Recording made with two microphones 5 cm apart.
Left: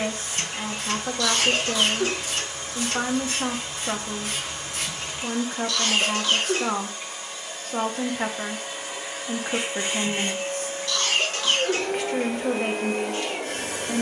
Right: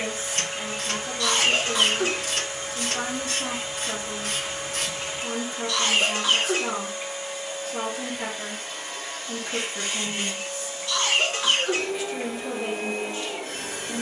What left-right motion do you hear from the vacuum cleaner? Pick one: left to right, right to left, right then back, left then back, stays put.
right to left.